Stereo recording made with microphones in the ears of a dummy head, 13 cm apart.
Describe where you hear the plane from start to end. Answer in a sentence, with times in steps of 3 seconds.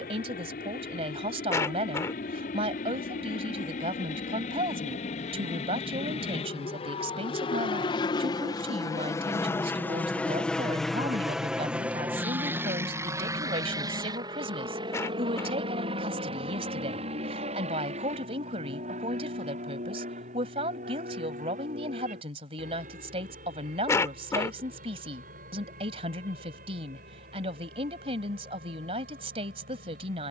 You can hear the plane on the left from 0 s, in the centre from 9 s and on the right from 12 s.